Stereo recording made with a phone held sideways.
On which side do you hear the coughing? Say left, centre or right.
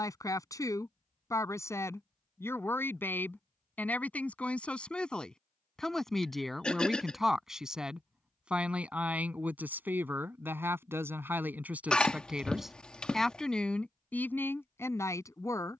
centre.